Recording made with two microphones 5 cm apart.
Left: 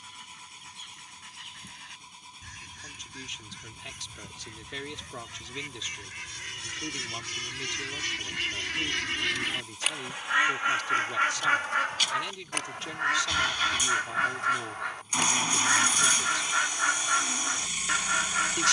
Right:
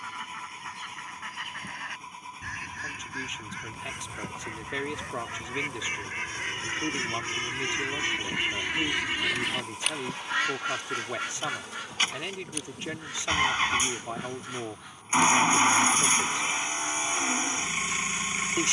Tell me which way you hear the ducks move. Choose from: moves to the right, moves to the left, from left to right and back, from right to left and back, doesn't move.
moves to the left.